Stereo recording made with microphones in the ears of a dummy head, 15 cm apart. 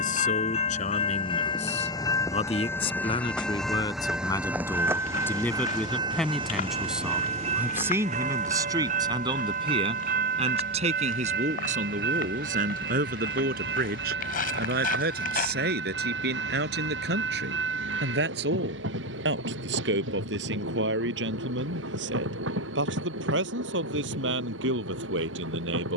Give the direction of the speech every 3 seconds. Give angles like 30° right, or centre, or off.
40° left, 20° left, 10° right, 40° right, 50° right, 60° right, 70° right, 70° right, 80° right.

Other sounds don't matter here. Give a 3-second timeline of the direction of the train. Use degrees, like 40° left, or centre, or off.
30° left, 10° right, 40° right, 50° right, 60° right, 70° right, 70° right, 70° right, 70° right.